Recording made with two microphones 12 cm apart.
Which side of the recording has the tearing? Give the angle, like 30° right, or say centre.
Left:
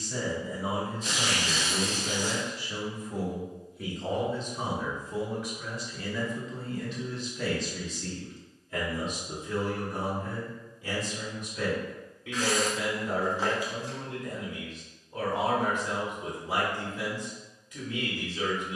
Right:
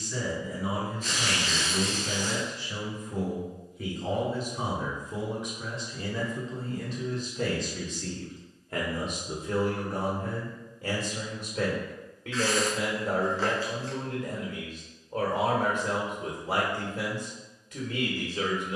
10° left.